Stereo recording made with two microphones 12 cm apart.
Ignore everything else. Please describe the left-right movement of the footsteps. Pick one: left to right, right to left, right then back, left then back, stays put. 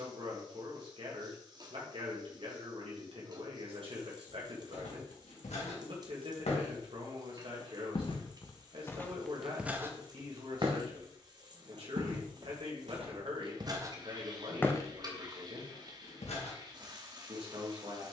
right then back.